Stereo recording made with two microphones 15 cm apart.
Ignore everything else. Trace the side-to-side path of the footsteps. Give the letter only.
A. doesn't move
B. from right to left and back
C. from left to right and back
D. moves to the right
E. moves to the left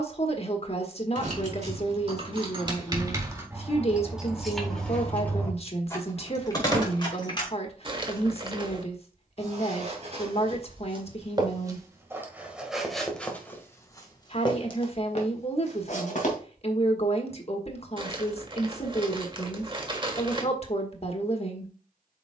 E.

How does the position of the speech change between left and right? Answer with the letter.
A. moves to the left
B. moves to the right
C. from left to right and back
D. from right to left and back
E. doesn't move
E.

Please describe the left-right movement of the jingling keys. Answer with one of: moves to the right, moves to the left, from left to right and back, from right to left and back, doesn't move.
moves to the left.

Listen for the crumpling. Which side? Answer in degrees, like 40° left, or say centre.
30° right.